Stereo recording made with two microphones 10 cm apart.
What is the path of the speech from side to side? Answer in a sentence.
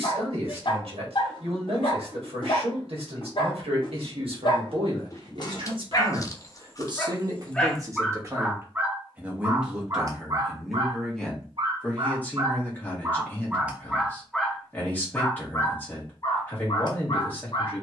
In this clip you hear the speech go from the right side to the left.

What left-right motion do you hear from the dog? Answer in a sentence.
In this clip you hear the dog move from left to right and back again.